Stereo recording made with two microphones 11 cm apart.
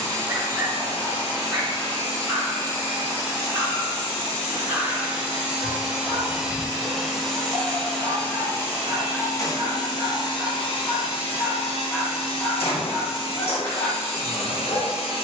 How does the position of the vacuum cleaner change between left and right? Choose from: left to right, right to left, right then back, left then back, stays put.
right to left.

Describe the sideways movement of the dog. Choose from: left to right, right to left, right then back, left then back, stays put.
right to left.